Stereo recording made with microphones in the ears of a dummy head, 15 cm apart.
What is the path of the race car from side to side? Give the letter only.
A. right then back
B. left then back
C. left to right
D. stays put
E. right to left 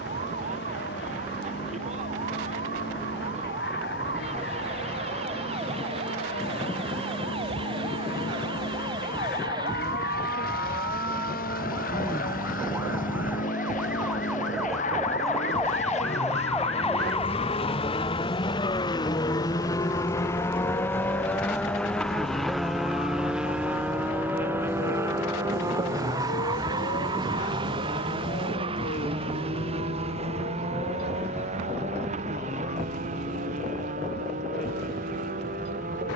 C.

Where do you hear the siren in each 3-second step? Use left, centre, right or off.
right, right, right, right, centre, centre, left, left, left, left, left, left.